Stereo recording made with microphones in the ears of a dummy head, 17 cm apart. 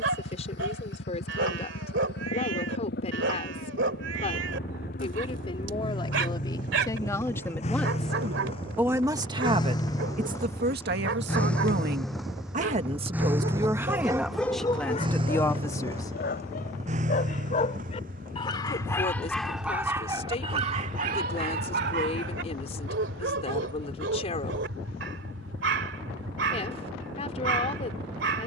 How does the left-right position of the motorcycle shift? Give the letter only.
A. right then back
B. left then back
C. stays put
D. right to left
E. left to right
E.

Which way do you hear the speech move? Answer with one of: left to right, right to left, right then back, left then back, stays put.
right then back.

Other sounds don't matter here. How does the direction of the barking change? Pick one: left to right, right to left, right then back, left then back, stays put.
left then back.